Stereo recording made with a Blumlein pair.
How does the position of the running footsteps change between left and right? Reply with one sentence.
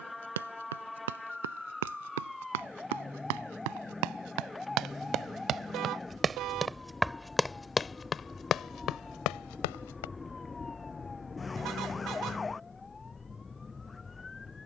You can hear the running footsteps move to the left.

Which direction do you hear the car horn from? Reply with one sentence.
In this clip you hear the car horn on the right.